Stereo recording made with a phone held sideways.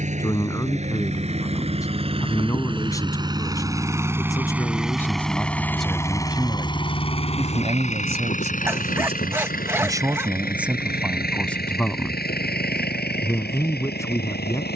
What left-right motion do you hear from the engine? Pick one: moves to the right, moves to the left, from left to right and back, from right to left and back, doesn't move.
moves to the left.